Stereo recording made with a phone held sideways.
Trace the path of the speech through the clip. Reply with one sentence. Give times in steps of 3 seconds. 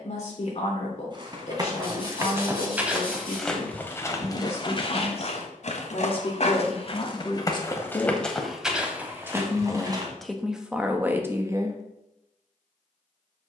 You can hear the speech on the left from 0 s, in the centre from 9 s and not at all from 12 s.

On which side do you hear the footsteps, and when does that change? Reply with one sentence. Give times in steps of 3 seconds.
You can hear the footsteps on the right from 0 s, on the left from 3 s, on the right from 9 s and not at all from 12 s.